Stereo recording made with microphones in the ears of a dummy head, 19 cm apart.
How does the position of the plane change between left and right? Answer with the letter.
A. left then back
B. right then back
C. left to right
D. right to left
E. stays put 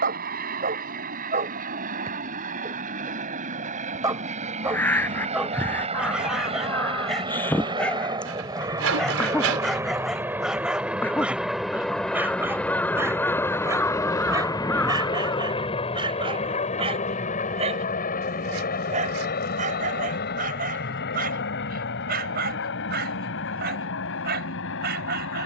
D.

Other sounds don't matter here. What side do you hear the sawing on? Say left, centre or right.
right.